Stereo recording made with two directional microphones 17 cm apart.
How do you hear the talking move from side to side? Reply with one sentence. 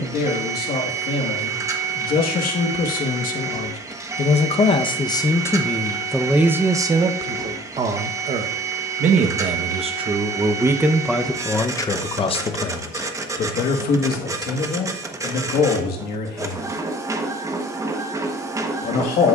You can hear the talking move from left to right and back again.